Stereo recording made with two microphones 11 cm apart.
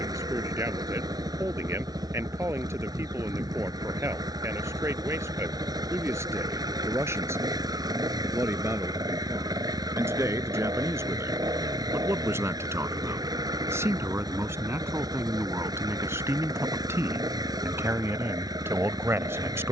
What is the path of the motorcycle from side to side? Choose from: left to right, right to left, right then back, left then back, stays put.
stays put.